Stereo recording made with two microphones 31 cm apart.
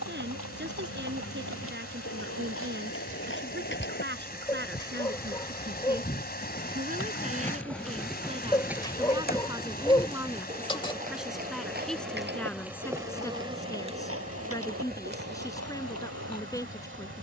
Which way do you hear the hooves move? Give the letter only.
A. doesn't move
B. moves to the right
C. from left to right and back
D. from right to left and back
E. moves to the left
B.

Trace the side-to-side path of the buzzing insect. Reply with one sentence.
You can hear the buzzing insect move from right to left and back again.